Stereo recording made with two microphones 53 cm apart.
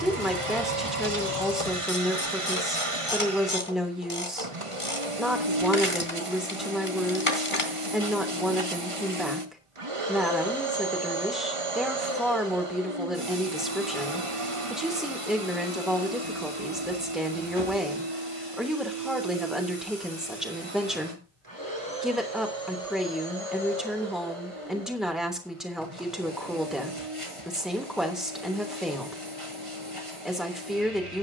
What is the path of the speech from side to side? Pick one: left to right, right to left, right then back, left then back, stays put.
stays put.